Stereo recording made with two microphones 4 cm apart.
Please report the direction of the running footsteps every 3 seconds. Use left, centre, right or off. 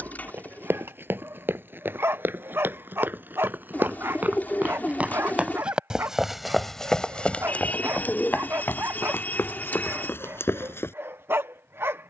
right, right, left, left.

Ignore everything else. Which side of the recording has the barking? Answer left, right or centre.
right.